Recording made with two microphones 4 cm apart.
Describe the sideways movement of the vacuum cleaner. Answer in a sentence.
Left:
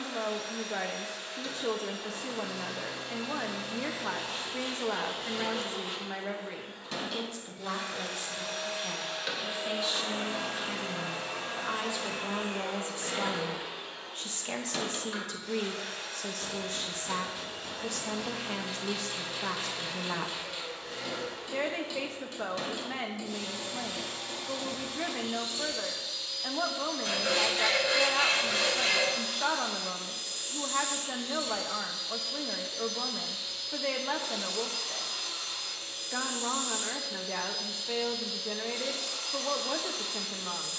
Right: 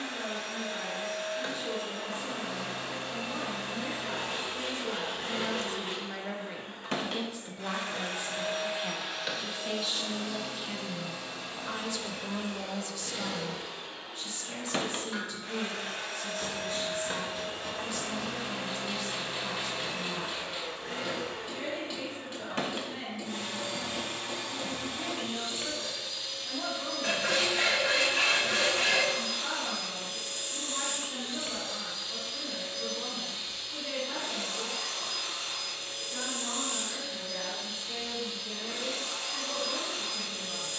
In this clip you hear the vacuum cleaner move from right to left and back again.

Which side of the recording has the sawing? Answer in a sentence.
In this clip you hear the sawing on the right.